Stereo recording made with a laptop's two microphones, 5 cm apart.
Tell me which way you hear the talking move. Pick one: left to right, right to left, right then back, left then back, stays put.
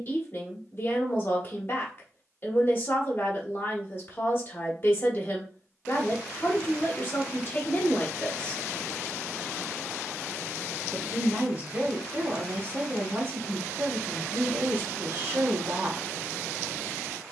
left to right.